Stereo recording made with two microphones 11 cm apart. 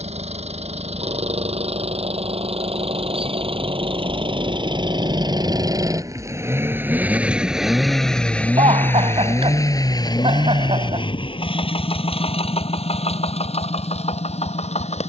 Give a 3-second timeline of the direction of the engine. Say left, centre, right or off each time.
right, right, centre, left, left.